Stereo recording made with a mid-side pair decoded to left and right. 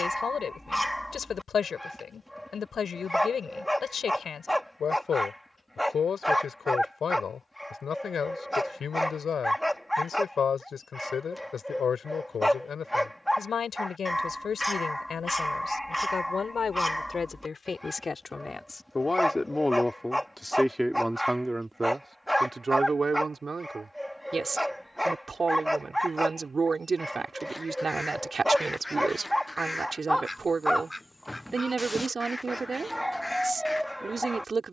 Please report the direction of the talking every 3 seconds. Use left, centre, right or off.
left, left, left, left, left, left, centre, right, right, right, right, right.